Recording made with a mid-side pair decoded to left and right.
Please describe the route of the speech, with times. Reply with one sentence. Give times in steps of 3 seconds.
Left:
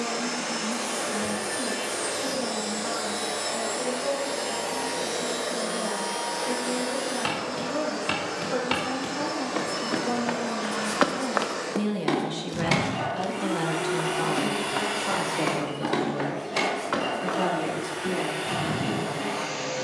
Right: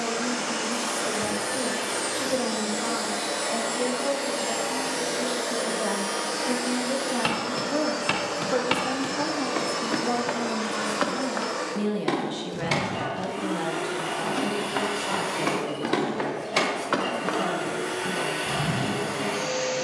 You can hear the speech on the right from 0 s, in the centre from 9 s and on the left from 12 s.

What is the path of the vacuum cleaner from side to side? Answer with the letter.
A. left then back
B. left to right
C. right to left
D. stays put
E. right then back
A.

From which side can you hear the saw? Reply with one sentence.
In this clip you hear the saw in the centre.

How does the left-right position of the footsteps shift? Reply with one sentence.
In this clip you hear the footsteps move from right to left and back again.